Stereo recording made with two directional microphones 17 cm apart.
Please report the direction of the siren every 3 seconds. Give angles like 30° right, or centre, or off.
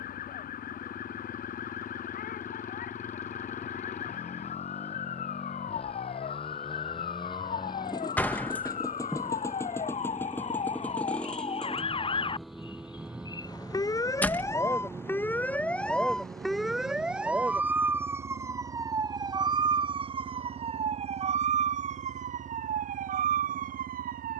60° left, 60° left, 50° left, 40° left, 20° left, centre, 30° right, 50° right.